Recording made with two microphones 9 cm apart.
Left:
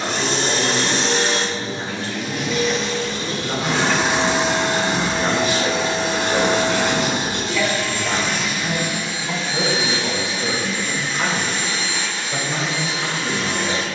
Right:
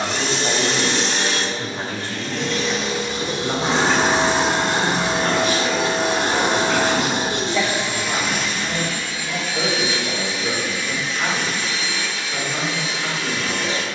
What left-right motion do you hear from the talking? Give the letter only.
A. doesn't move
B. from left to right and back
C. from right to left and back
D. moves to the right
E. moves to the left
E.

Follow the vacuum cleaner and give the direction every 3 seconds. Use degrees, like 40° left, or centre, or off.
30° left, 40° right, 30° right, 30° left, 40° left.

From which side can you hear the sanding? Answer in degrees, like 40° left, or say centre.
70° right.